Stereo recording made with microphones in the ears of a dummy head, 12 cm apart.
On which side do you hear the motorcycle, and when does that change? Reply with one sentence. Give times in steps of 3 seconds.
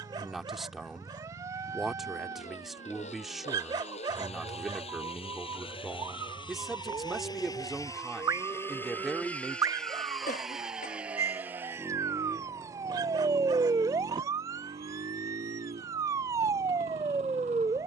In this clip you hear the motorcycle on the left from 0 s, in the centre from 9 s and on the right from 12 s.